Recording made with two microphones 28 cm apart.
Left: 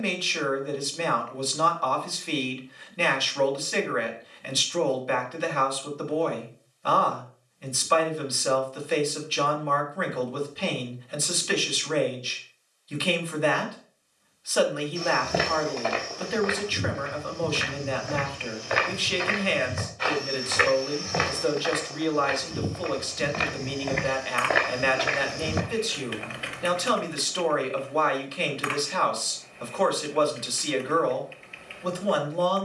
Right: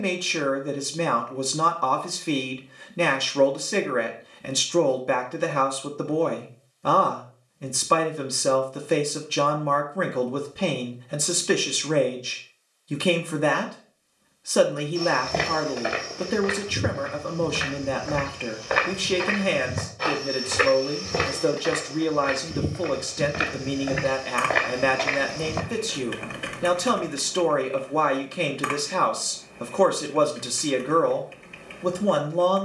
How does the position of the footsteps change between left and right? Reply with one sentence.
You can hear the footsteps go right and come back.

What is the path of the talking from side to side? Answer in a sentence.
In this clip you hear the talking stay put.